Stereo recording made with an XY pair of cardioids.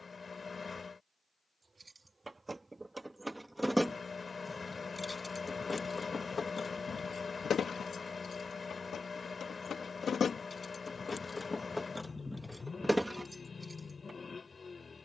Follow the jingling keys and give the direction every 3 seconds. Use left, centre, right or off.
right, centre, left, left, centre.